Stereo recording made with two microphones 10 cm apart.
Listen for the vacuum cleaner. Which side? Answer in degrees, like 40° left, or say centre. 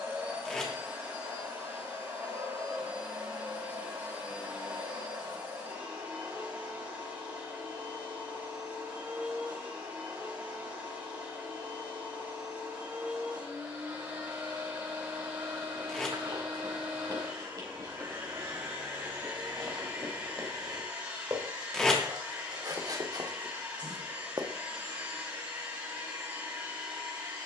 20° right.